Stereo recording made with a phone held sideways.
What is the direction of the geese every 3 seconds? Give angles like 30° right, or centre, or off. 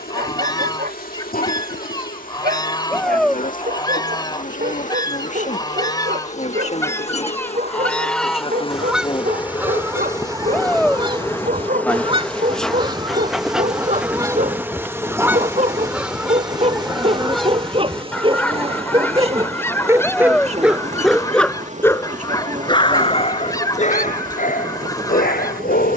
30° left, 30° left, 10° left, 20° right, 30° right, centre, 10° left, 20° left, 20° left.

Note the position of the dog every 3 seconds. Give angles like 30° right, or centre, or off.
60° right, 60° right, 60° right, 50° right, 50° right, 40° right, 20° right, 30° left, 60° left.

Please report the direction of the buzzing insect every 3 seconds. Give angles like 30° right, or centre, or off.
60° left, 50° left, 40° left, 20° left, centre, 30° right, 40° right, 50° right, 60° right.